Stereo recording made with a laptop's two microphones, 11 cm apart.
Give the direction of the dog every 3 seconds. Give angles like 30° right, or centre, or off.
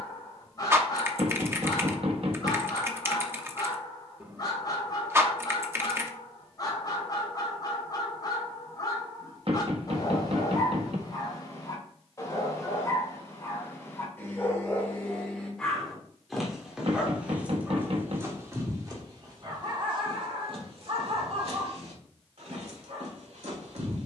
30° left, 30° left, 30° left, 30° left, 20° left, centre, 40° right, 70° right.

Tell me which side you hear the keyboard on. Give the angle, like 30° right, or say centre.
20° right.